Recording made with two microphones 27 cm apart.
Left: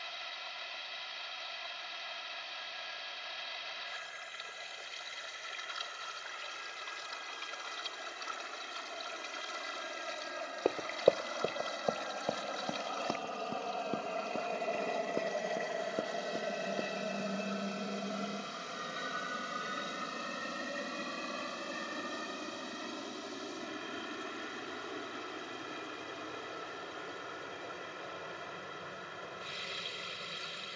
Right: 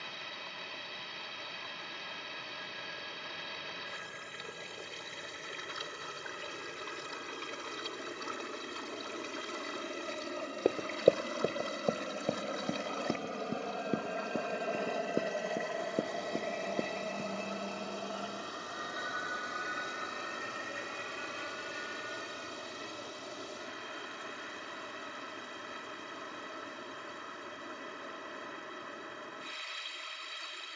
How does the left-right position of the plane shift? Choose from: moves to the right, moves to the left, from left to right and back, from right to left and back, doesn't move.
moves to the left.